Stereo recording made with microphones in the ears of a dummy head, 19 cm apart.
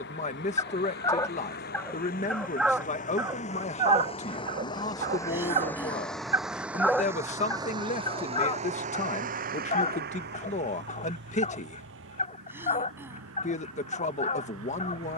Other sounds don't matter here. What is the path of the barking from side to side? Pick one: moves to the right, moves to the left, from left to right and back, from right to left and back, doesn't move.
from left to right and back.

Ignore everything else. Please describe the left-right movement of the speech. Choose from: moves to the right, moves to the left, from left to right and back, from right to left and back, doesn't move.
doesn't move.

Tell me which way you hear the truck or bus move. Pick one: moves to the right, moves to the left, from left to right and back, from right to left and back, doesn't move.
moves to the right.